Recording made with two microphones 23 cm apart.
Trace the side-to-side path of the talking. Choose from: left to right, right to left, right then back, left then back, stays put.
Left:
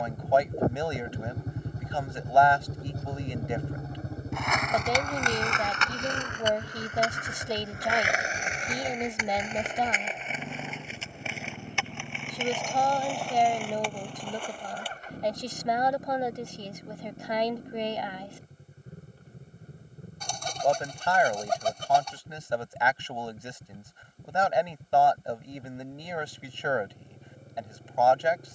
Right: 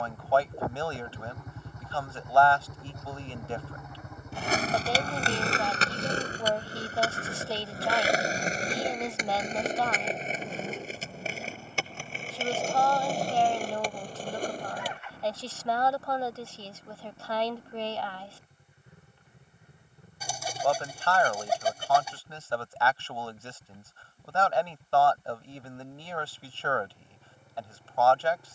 stays put.